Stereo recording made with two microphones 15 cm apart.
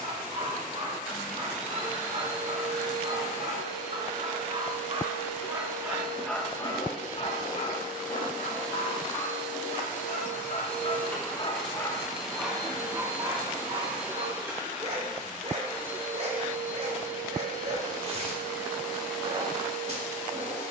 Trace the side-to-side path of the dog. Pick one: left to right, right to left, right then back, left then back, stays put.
left then back.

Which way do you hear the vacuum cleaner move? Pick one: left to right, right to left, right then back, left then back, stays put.
left then back.